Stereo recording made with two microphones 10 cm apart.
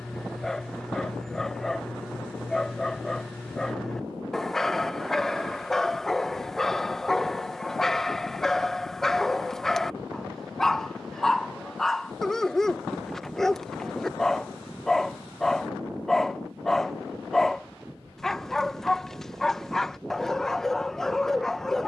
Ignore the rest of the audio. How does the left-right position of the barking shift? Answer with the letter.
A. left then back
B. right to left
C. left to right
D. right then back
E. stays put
E.